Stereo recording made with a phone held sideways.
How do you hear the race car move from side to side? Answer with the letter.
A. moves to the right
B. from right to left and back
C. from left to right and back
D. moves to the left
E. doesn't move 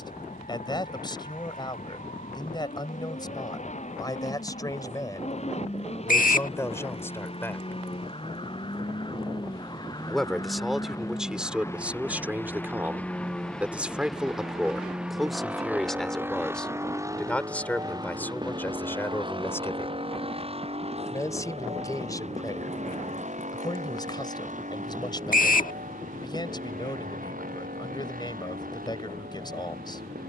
A.